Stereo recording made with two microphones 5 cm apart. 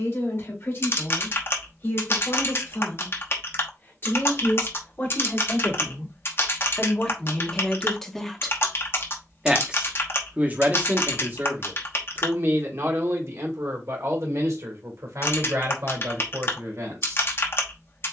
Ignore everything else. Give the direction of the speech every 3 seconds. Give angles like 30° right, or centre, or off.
50° left, 40° left, 20° left, 30° right, 60° right, 80° right.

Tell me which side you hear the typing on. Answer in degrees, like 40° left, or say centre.
50° left.